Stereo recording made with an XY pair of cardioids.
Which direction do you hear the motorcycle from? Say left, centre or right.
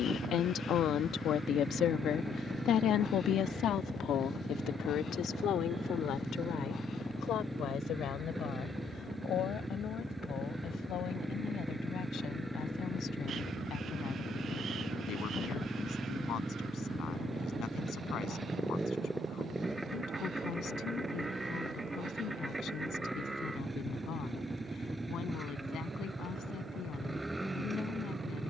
centre.